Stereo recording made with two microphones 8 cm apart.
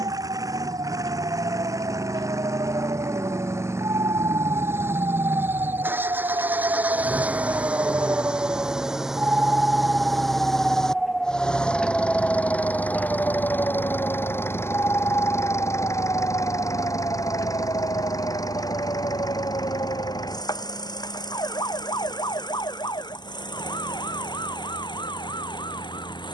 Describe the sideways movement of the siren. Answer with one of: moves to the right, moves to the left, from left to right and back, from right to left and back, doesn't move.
moves to the left.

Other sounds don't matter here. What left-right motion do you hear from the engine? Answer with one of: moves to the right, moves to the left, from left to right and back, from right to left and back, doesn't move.
moves to the left.